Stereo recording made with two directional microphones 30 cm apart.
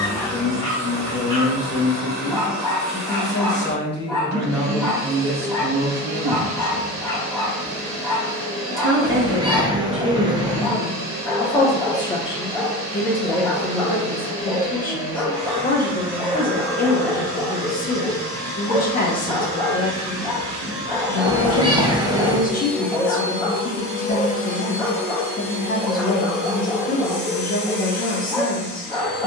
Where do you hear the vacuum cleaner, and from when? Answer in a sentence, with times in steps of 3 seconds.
You can hear the vacuum cleaner on the right from 0 s, in the centre from 21 s and on the left from 24 s.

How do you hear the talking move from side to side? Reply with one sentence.
In this clip you hear the talking go right and come back.